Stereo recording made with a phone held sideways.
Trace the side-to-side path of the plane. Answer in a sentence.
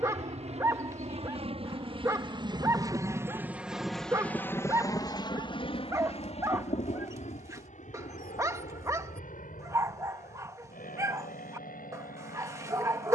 In this clip you hear the plane go from the right side to the left.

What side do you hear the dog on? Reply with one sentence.
In this clip you hear the dog on the right.